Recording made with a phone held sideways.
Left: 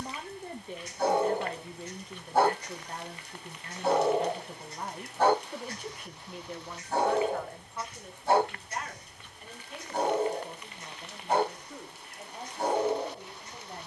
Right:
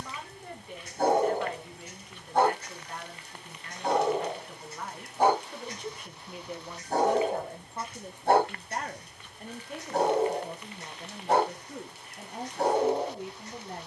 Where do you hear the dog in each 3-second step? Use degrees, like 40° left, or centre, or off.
30° right, centre, 40° right, 70° right, 70° right.